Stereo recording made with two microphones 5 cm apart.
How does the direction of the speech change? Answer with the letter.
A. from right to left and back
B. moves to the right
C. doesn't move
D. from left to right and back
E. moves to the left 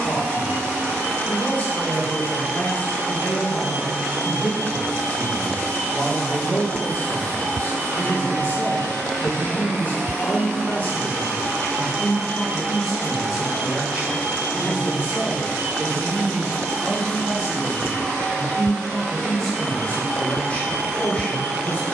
D.